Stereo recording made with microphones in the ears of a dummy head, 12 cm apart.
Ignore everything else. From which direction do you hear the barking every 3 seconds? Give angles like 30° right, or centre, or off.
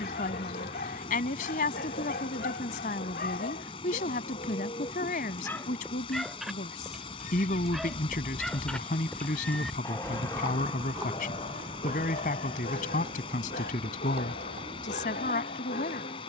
70° left, 50° left, centre, 30° left, 70° left, 70° left.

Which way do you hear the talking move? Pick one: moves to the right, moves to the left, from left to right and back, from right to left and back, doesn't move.
doesn't move.